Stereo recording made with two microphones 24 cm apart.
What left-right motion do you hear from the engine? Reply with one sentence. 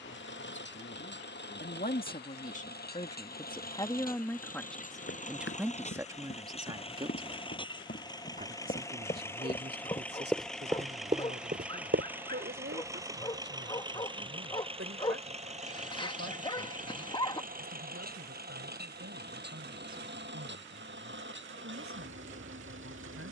In this clip you hear the engine travel towards the right.